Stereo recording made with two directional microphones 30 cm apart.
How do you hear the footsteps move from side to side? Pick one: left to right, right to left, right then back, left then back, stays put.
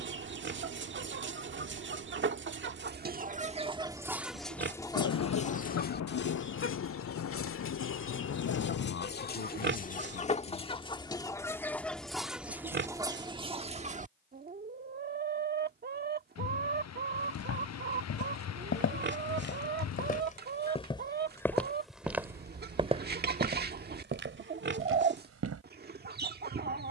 left to right.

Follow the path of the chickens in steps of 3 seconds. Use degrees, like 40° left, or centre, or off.
40° right, centre, 40° left, 20° left, 20° right, 30° right, 30° right, 30° right, 30° right.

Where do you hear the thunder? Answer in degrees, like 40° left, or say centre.
50° left.